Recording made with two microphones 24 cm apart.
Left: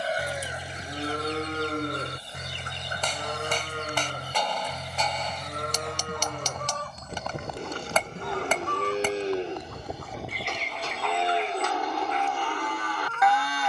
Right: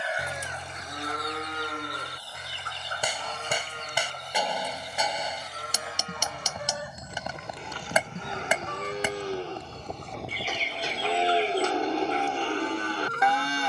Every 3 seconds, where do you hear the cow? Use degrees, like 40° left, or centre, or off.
30° left, 60° left, 50° left, centre, 30° right.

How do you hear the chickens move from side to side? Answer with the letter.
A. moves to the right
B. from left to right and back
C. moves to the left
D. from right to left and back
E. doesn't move
A.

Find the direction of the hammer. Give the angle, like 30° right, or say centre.
10° right.